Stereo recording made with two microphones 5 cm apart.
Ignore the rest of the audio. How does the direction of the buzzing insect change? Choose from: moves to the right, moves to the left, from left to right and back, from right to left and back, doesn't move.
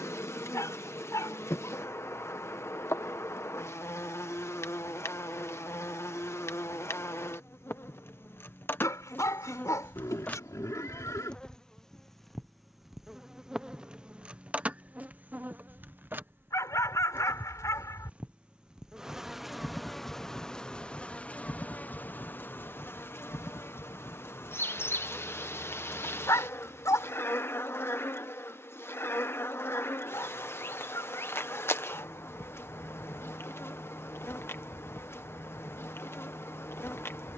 from left to right and back.